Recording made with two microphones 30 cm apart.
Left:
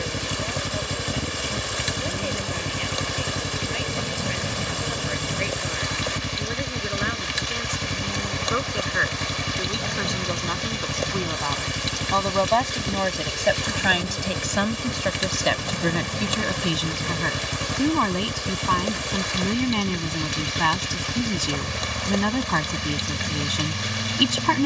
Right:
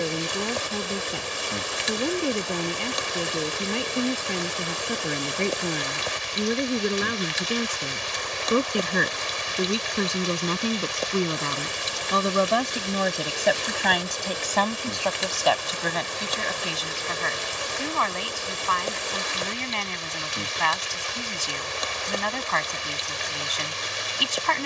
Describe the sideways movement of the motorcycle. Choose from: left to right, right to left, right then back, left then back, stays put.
stays put.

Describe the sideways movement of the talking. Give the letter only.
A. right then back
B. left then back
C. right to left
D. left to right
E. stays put
C.